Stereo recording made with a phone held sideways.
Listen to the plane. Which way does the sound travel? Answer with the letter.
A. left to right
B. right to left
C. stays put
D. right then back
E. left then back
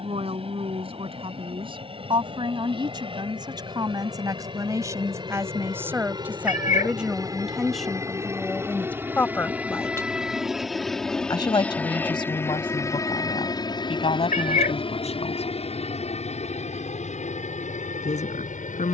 B.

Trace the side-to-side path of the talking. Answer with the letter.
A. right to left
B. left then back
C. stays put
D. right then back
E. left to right
A.